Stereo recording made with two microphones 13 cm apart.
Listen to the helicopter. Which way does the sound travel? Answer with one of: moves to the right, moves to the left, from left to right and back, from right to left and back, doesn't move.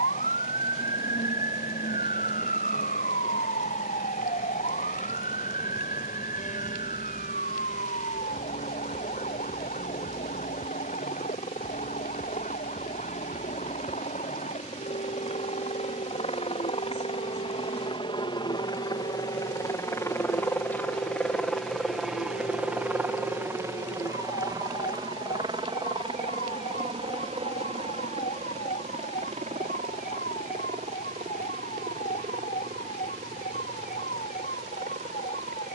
moves to the right.